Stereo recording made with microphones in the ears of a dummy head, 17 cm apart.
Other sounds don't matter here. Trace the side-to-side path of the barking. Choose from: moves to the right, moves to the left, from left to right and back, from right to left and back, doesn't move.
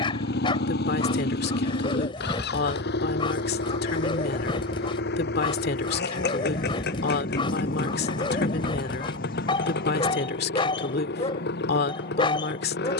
doesn't move.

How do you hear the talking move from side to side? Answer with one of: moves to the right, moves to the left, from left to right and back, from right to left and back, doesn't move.
doesn't move.